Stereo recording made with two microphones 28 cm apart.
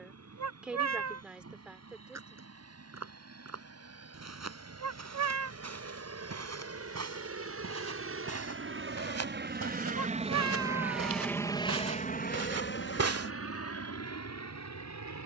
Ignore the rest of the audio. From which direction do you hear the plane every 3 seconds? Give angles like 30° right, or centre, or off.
80° right, 70° right, 60° right, 10° right, 50° left.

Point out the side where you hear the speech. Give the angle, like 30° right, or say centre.
centre.